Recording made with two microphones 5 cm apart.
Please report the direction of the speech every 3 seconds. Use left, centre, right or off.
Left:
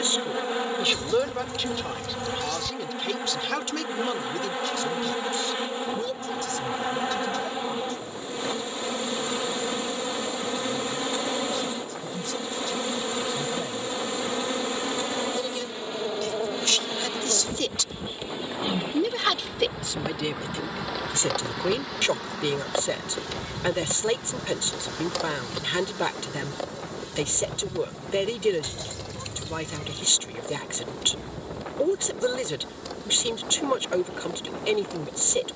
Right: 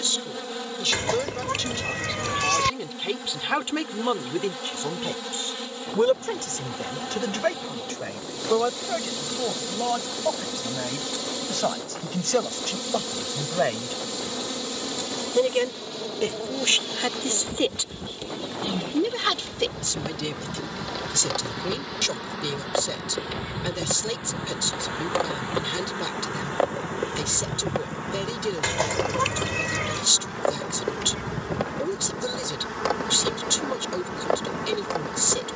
centre, right, right, right, right, right, centre, left, left, left, left, left.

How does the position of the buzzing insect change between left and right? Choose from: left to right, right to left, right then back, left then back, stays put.
left to right.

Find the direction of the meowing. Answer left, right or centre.
right.